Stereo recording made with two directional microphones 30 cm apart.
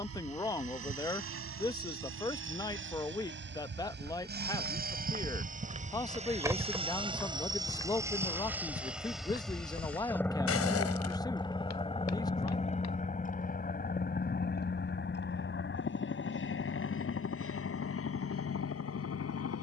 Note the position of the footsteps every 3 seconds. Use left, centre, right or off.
off, right, centre, left, left, off, off.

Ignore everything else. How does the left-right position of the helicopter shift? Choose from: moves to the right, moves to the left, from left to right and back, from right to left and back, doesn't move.
moves to the left.